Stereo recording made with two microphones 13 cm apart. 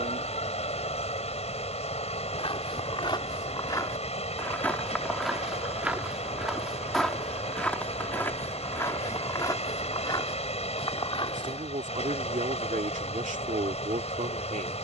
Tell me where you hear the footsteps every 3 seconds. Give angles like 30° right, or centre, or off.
50° left, 10° left, 10° left, 40° left, off.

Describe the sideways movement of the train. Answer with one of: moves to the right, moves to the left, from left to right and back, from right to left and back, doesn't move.
doesn't move.